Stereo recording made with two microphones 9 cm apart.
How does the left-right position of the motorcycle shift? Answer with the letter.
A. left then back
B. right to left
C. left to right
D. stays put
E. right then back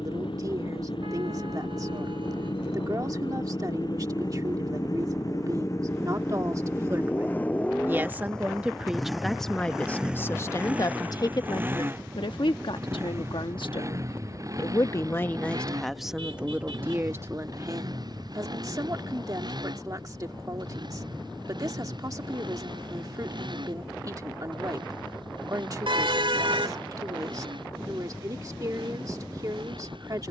C.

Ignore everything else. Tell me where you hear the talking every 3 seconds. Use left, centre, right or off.
right, right, right, left, left, centre, right, right, right, right.